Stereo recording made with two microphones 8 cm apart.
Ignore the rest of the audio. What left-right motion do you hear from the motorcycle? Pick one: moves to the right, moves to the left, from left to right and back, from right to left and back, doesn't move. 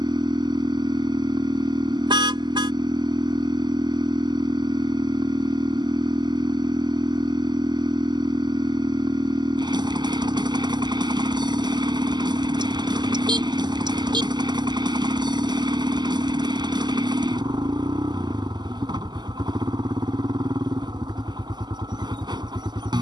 doesn't move.